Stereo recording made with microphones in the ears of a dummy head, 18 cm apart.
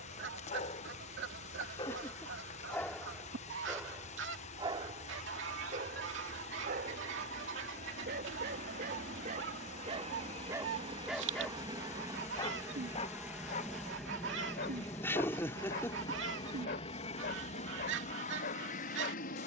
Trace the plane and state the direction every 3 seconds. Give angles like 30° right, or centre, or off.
60° right, 60° right, 50° right, 30° right, centre, 20° left, 40° left.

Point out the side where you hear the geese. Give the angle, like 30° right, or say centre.
70° right.